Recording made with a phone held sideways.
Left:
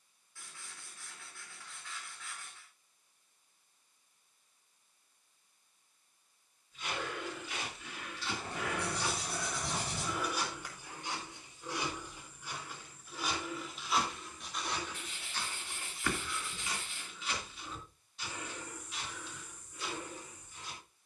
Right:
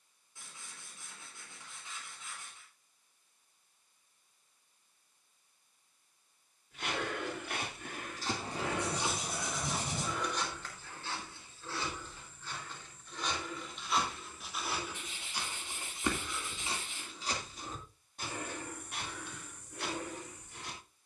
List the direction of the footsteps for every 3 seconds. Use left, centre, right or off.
off, off, right, centre, centre, right, right.